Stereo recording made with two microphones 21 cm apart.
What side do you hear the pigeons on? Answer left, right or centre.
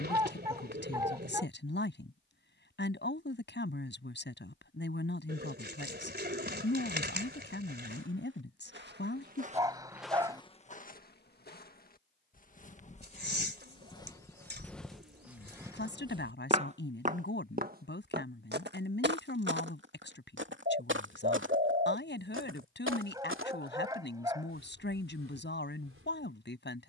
right.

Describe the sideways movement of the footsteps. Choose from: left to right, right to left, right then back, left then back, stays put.
left then back.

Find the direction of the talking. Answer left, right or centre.
left.